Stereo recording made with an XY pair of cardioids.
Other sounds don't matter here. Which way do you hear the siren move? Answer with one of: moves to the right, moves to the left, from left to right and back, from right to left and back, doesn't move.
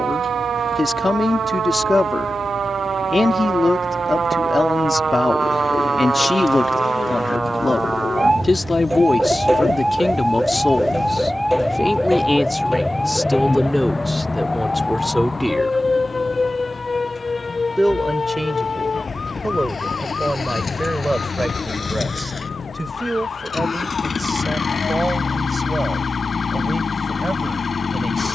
moves to the left.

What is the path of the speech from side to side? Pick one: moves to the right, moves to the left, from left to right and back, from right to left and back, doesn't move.
moves to the right.